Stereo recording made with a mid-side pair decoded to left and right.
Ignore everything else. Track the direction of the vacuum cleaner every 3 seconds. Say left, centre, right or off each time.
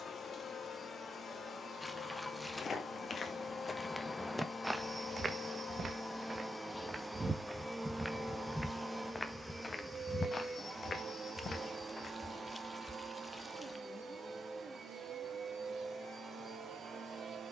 left, left, centre, right, right, right.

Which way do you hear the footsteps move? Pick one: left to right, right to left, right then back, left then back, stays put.
right then back.